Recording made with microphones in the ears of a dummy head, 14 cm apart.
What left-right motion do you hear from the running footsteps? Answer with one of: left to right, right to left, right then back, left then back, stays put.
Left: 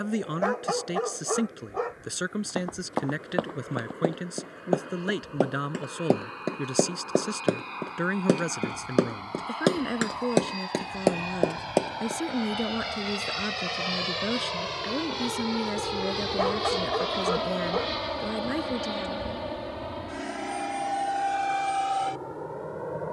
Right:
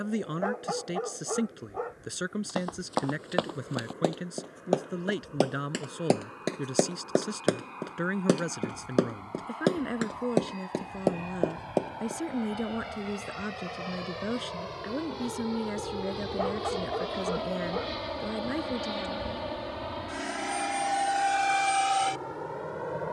right to left.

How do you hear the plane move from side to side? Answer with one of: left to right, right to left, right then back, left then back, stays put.
left to right.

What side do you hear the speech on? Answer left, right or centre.
centre.